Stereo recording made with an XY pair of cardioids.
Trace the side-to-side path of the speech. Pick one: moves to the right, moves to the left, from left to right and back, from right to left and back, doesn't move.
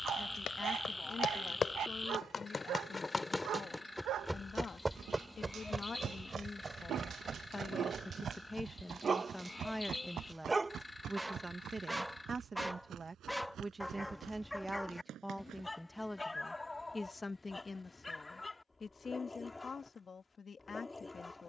from left to right and back.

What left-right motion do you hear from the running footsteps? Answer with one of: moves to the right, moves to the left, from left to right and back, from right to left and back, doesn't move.
moves to the right.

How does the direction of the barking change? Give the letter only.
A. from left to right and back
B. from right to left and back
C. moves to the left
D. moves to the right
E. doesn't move
C.